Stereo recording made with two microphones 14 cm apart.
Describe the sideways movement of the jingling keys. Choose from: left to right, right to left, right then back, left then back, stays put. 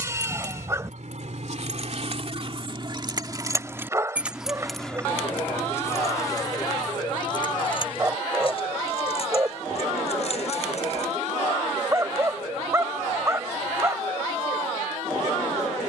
right to left.